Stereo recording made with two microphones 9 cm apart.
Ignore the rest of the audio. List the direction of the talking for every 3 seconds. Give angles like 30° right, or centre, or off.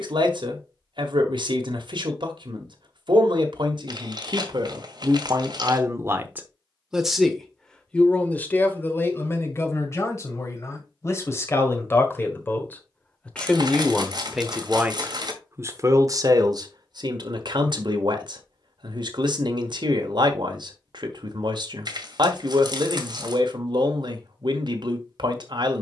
70° right, 60° right, 10° left, 30° left, 10° left, 50° right, 60° right, 60° right, 60° right.